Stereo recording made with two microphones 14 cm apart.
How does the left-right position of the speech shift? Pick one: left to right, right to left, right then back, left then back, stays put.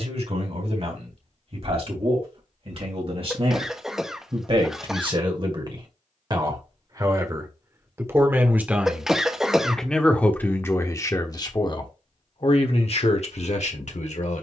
right to left.